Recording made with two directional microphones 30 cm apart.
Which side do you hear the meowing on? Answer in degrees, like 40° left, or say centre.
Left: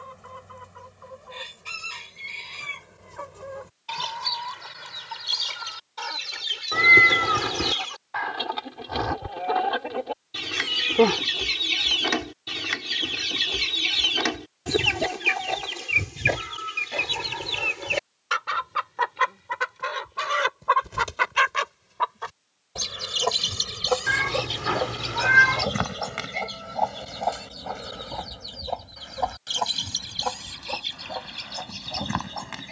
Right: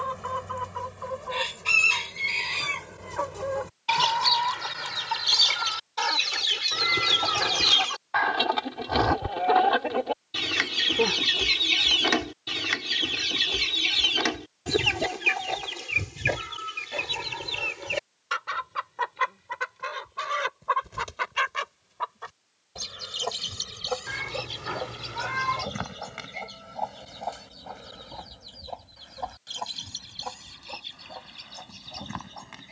60° left.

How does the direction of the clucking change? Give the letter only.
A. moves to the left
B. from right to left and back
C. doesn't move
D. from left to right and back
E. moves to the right
A.